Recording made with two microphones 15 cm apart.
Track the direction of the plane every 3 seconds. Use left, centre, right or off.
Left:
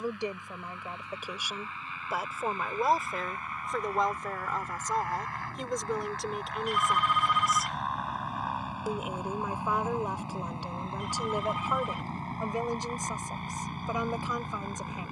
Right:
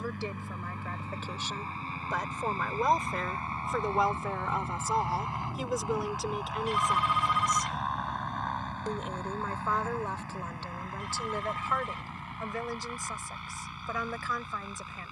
right, right, centre, left, left.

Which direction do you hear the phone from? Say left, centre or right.
right.